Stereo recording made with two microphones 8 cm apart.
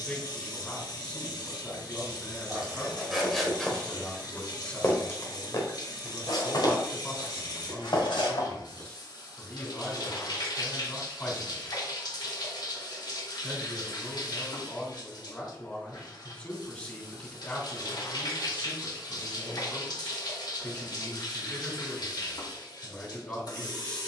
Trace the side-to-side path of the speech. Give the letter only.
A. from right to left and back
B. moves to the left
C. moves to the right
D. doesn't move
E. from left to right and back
D.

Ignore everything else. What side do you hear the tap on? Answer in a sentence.
You can hear the tap on the left.